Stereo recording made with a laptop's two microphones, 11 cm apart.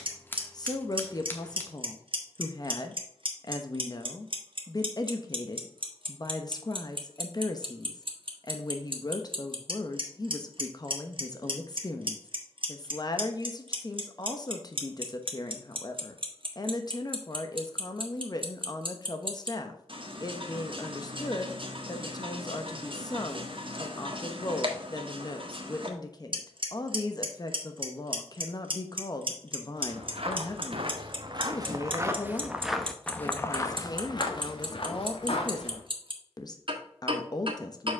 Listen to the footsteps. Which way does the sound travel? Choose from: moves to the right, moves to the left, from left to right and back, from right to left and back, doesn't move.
moves to the left.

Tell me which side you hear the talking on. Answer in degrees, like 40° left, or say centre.
40° left.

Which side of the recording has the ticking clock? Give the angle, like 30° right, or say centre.
50° right.